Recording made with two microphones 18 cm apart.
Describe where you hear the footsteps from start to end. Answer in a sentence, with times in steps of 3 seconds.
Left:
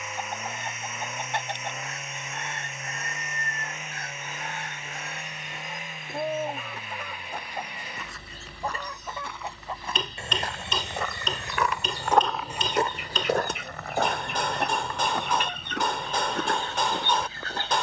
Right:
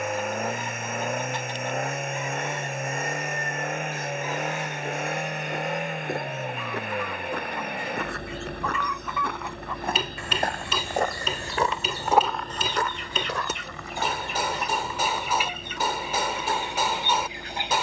In this clip you hear the footsteps not at all from 0 s, on the right from 3 s and on the left from 12 s.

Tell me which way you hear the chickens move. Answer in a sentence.
In this clip you hear the chickens go from the left side to the right.